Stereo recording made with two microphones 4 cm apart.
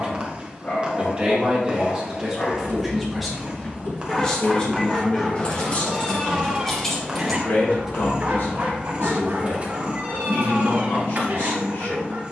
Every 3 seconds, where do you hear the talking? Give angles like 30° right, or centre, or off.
20° right, 20° left, 50° left, 70° left.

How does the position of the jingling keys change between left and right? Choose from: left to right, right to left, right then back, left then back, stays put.
left to right.